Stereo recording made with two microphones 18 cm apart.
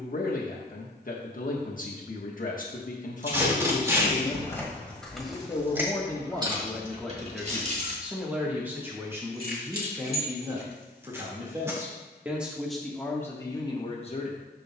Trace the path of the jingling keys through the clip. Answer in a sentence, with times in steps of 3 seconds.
You can hear the jingling keys not at all from 0 s, in the centre from 3 s, on the right from 6 s and not at all from 12 s.